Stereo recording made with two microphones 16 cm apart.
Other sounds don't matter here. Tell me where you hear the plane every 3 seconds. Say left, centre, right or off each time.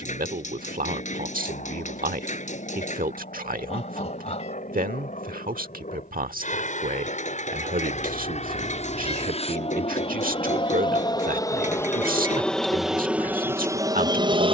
left, left, left, left, centre.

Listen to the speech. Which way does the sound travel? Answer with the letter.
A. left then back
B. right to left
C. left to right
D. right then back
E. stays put
E.